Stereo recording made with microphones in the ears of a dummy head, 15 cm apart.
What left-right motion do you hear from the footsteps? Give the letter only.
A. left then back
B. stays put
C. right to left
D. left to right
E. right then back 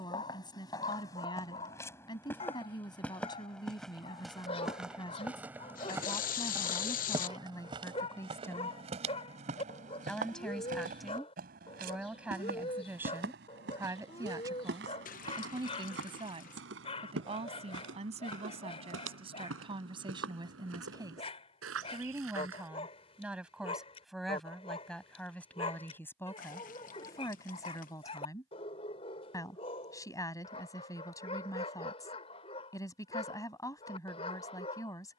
D.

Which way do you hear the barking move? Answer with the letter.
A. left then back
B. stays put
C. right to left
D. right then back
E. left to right
B.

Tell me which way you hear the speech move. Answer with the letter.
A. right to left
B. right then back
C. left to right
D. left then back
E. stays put
B.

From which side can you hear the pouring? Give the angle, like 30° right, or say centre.
40° left.